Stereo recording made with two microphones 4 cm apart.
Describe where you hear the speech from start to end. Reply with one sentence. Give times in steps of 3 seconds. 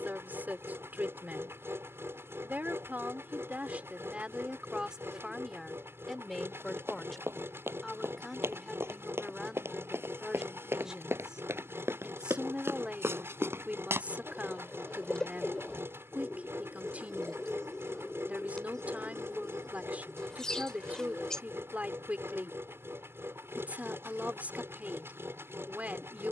In this clip you hear the speech on the right from 0 s, in the centre from 6 s and on the right from 12 s.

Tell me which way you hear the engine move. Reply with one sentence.
In this clip you hear the engine stay put.